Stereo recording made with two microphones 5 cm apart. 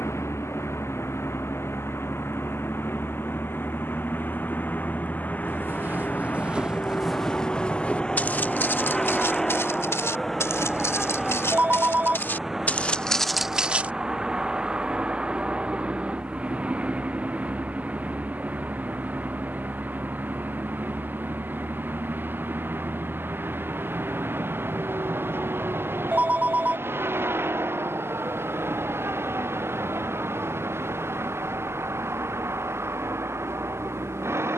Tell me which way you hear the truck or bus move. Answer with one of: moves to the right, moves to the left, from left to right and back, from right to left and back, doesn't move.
moves to the right.